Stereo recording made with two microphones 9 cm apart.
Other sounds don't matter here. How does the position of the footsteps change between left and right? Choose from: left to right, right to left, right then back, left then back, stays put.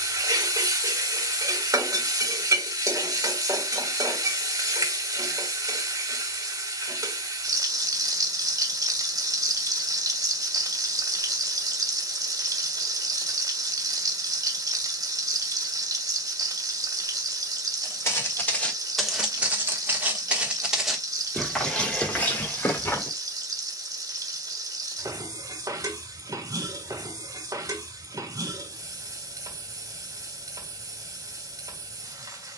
right then back.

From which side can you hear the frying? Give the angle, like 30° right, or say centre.
40° right.